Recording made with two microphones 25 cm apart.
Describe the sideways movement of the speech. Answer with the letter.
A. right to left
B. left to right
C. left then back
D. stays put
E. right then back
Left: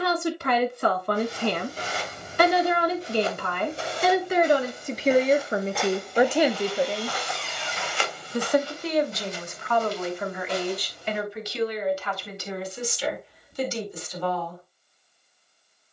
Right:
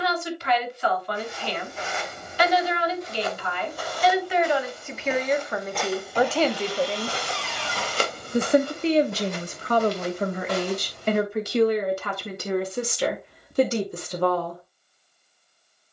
B.